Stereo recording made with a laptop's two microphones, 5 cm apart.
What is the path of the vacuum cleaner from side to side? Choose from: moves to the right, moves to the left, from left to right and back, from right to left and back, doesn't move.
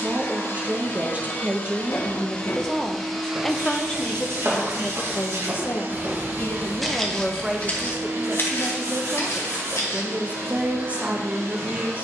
moves to the right.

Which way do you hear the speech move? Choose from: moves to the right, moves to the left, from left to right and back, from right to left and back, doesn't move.
from right to left and back.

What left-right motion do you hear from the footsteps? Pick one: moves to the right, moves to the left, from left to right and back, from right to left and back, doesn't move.
from left to right and back.